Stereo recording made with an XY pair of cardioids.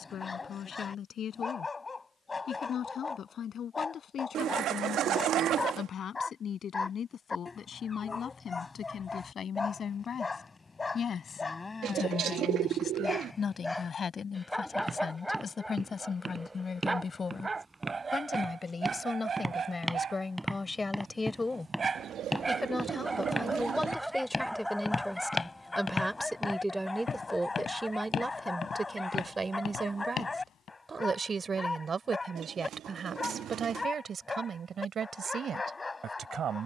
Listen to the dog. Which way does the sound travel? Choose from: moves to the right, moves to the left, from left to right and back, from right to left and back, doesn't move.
from left to right and back.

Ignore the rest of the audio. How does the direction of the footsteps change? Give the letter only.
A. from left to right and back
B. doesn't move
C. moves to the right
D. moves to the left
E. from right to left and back
D.